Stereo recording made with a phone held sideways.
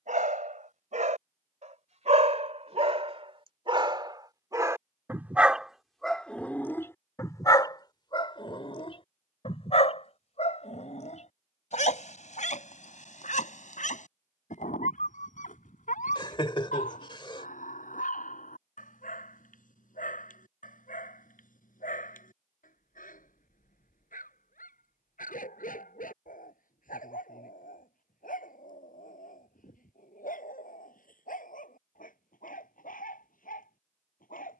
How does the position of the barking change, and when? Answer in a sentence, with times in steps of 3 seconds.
In this clip you hear the barking on the right from 0 s and on the left from 6 s.